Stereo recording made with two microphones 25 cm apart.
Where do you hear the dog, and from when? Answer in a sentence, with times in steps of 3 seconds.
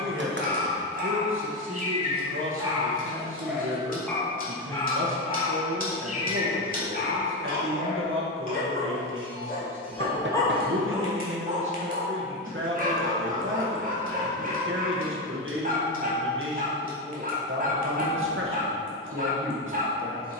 In this clip you hear the dog on the right from 0 s, in the centre from 3 s, on the left from 6 s, in the centre from 9 s and on the right from 12 s.